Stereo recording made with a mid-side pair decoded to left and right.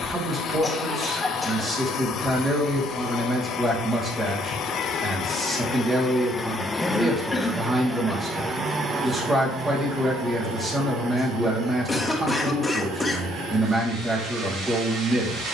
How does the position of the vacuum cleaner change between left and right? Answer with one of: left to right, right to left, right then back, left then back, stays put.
left to right.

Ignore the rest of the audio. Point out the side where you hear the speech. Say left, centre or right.
right.